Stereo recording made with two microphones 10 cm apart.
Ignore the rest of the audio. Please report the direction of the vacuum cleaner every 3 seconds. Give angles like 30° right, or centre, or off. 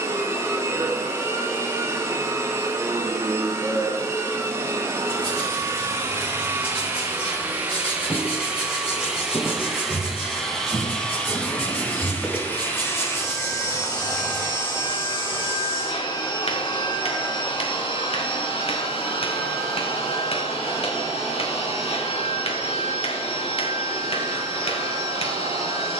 20° right, 20° right, 20° right, centre, 20° left, 40° left, 60° left, 60° left, 70° left.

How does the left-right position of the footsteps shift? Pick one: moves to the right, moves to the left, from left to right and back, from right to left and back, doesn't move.
moves to the left.